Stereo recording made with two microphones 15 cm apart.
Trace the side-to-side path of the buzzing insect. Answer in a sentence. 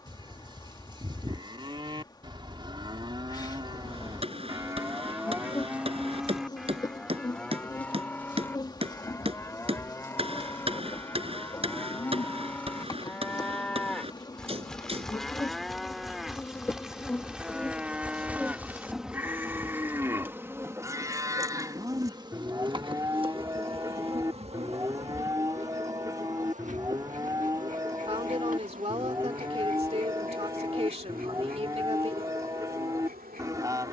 In this clip you hear the buzzing insect move from left to right.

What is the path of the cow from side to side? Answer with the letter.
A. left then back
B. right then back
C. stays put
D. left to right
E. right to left
A.